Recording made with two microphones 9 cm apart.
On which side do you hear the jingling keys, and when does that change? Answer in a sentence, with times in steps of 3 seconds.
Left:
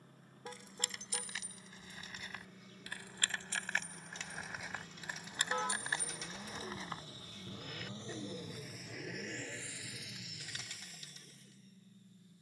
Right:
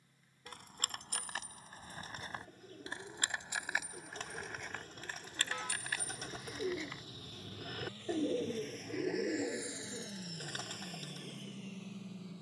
In this clip you hear the jingling keys on the right from 0 s, in the centre from 3 s and on the left from 6 s.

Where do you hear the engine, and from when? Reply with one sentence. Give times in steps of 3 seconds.
You can hear the engine on the left from 0 s and on the right from 9 s.